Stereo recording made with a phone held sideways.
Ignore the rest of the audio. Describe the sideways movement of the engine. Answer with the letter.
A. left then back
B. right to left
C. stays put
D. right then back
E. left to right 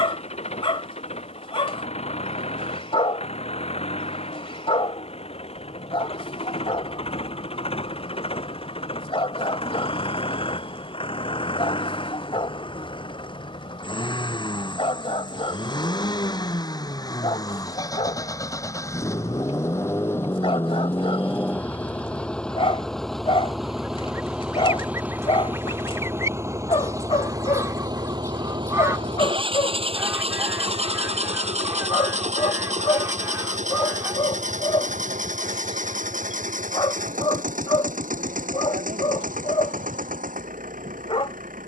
E.